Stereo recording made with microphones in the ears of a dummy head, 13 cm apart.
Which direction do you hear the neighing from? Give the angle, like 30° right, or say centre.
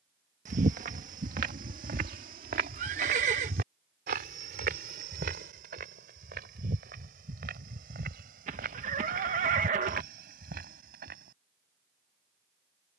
50° right.